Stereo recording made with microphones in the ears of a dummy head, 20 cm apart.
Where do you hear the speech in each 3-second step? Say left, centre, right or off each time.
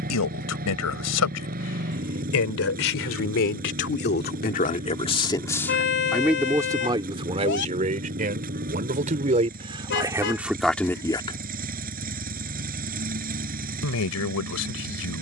left, left, right, centre, left.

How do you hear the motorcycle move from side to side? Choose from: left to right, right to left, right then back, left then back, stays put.
stays put.